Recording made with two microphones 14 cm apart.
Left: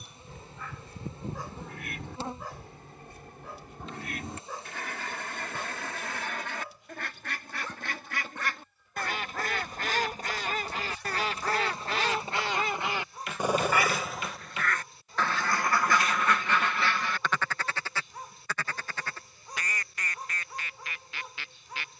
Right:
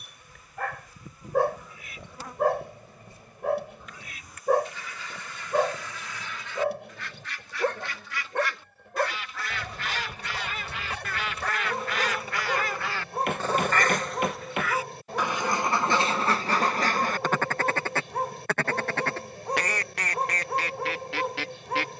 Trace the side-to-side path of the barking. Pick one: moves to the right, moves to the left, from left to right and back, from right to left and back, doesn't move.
doesn't move.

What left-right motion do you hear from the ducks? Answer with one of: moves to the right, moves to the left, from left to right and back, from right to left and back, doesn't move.
moves to the right.